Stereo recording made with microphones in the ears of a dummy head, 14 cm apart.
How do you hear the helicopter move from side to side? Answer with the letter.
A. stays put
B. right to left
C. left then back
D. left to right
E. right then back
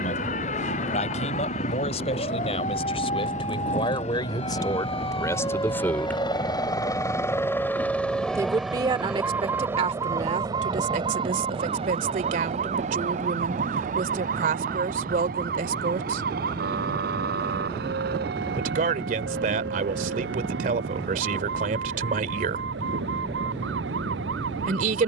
D.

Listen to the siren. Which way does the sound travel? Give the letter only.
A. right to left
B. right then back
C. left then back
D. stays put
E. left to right
E.